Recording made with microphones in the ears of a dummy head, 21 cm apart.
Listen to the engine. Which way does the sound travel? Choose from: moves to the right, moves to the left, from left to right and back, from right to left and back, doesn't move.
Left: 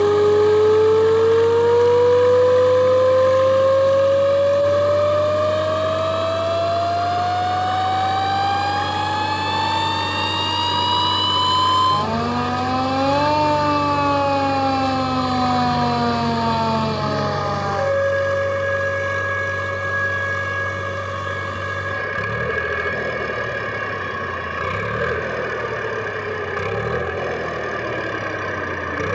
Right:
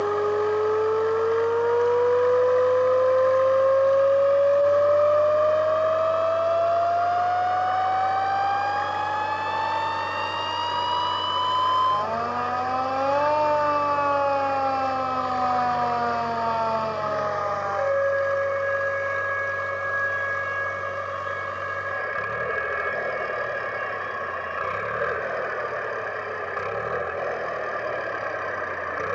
doesn't move.